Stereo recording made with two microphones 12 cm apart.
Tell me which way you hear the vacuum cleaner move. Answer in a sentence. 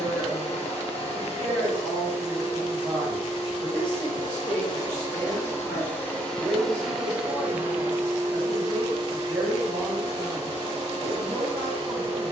You can hear the vacuum cleaner travel towards the right.